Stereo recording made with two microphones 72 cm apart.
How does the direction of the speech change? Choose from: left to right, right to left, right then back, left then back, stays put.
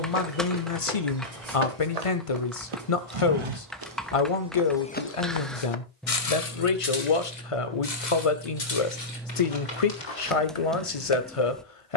stays put.